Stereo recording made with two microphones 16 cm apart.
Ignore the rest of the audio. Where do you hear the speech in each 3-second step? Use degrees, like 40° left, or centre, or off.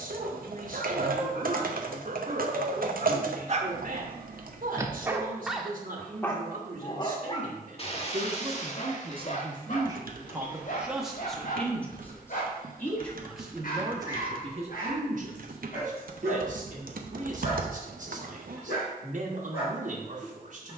60° right, 60° right, 60° right, 10° right, 10° right, 60° right, 60° right.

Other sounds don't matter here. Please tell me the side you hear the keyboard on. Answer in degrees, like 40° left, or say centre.
70° right.